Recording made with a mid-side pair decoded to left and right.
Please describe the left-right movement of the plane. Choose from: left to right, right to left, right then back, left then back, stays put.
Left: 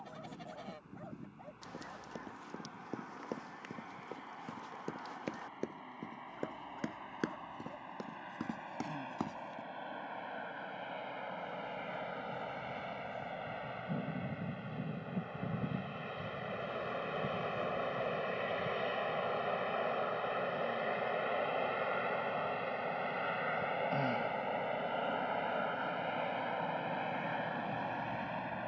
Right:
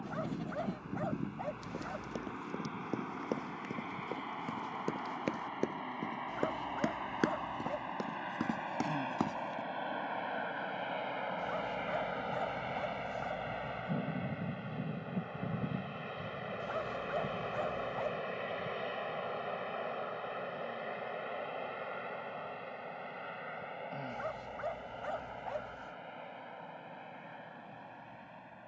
right to left.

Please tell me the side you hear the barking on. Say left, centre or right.
right.